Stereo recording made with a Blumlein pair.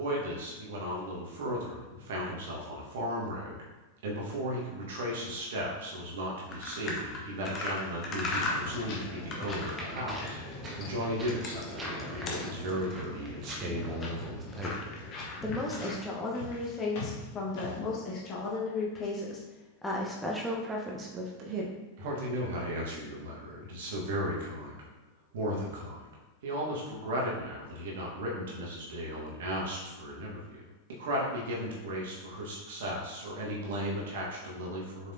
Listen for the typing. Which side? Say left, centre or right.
left.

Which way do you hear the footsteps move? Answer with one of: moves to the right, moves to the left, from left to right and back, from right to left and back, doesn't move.
from left to right and back.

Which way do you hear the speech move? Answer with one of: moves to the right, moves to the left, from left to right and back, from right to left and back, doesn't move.
from right to left and back.